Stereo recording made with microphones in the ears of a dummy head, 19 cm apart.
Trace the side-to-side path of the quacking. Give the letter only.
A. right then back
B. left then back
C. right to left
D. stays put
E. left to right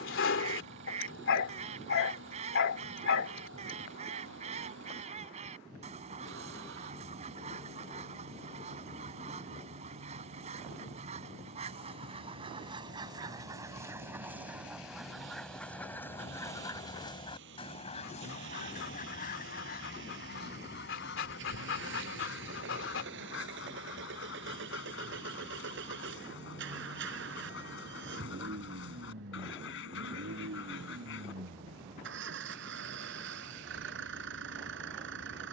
C.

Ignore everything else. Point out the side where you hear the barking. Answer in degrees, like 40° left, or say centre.
60° left.